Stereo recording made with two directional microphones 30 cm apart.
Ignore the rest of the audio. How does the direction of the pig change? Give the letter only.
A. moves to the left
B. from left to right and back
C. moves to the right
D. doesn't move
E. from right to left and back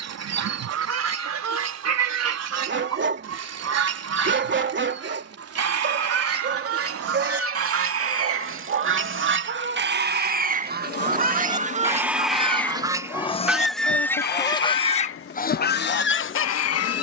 A.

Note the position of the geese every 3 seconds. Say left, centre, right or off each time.
right, right, right, right, centre, left.